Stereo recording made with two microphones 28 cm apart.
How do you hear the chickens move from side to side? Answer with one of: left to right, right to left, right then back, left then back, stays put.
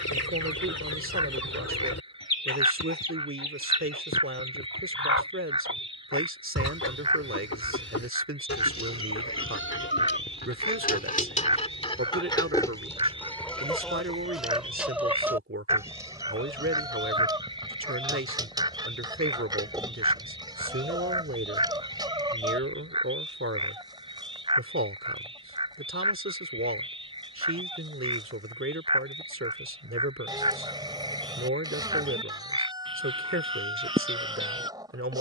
left to right.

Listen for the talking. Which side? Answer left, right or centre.
right.